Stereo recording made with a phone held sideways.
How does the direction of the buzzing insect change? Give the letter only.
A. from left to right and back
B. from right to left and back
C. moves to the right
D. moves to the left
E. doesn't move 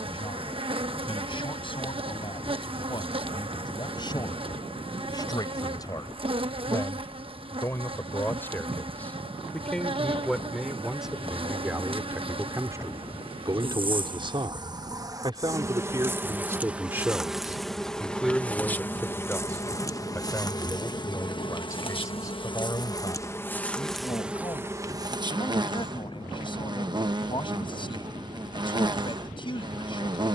B.